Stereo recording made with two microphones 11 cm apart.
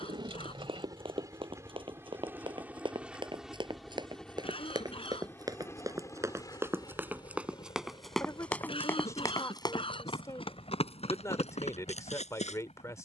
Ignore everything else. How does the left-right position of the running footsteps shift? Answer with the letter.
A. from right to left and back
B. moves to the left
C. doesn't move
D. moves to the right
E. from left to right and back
B.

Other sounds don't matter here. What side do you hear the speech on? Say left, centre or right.
left.